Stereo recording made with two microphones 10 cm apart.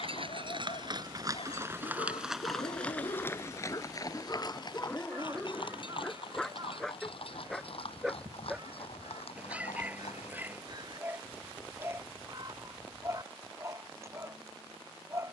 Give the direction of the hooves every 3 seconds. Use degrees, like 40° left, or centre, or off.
30° right, 40° left, 60° left, 60° left, off.